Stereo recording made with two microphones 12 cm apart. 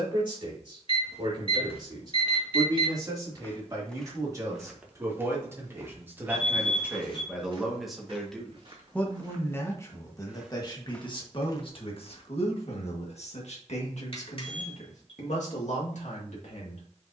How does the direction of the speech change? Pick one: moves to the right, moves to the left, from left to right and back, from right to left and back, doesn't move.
moves to the left.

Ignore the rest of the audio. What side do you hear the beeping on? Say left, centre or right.
left.